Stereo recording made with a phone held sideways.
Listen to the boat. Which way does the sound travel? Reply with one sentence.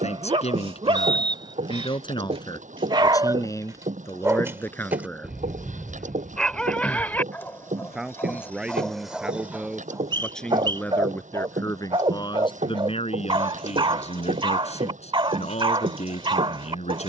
In this clip you hear the boat stay in one place.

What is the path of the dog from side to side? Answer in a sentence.
You can hear the dog go left and come back.